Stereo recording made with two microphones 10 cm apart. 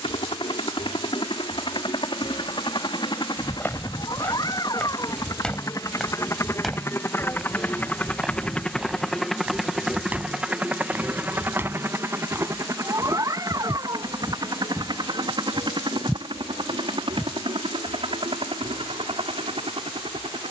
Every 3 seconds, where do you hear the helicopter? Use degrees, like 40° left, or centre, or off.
60° left, 40° left, 20° left, 10° right, 40° right, 50° right, 60° right.